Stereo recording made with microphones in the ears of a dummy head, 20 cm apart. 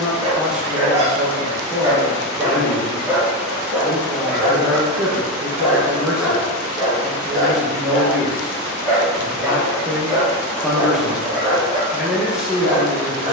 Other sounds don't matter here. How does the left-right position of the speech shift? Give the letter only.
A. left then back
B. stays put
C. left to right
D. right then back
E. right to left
B.